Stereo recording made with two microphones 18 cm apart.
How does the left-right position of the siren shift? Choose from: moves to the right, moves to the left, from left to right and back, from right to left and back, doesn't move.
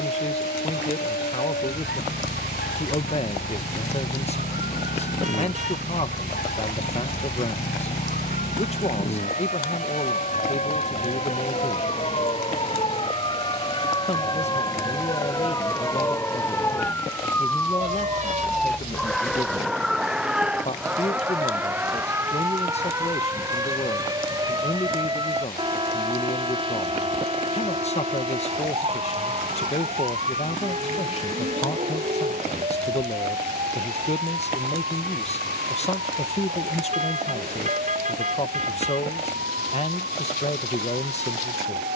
moves to the right.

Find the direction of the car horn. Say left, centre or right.
right.